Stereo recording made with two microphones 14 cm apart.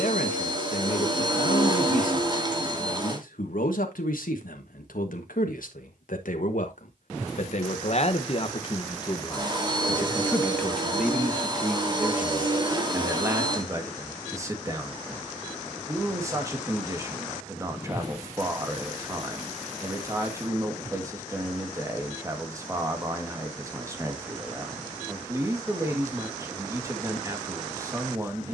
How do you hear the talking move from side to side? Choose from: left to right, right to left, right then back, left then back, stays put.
left to right.